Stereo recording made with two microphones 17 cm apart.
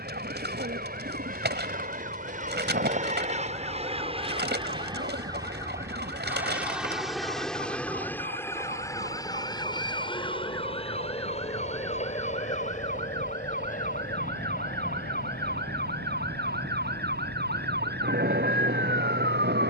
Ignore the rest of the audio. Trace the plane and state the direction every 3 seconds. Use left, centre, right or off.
right, right, centre, left, left, left, left.